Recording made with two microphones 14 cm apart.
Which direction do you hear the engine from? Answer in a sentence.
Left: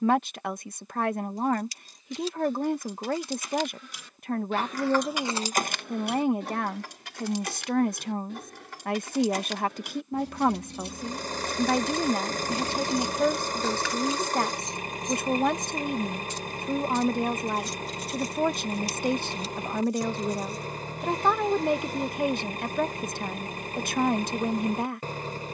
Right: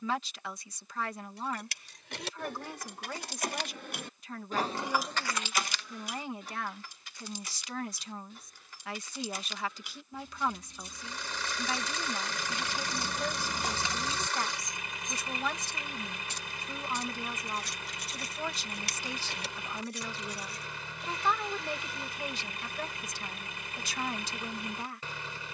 In this clip you hear the engine on the left.